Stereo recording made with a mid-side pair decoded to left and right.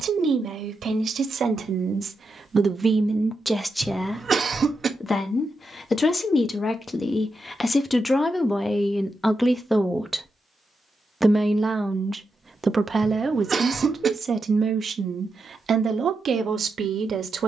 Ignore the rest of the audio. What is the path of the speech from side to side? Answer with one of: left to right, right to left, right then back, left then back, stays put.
left then back.